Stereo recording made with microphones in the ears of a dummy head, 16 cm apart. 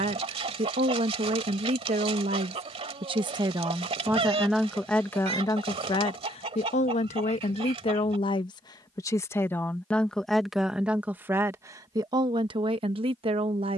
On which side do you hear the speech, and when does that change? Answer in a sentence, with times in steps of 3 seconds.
In this clip you hear the speech on the right from 0 s, in the centre from 3 s, on the left from 6 s, in the centre from 9 s and on the right from 12 s.